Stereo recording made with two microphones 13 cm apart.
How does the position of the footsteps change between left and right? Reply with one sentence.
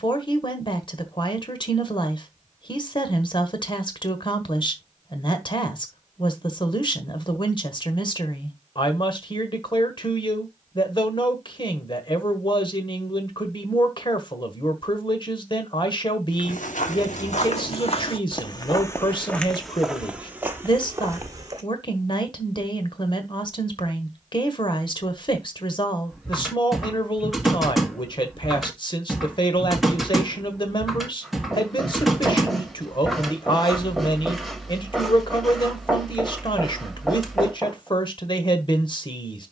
You can hear the footsteps move to the right.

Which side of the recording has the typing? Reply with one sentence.
You can hear the typing in the centre.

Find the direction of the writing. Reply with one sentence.
In this clip you hear the writing in the centre.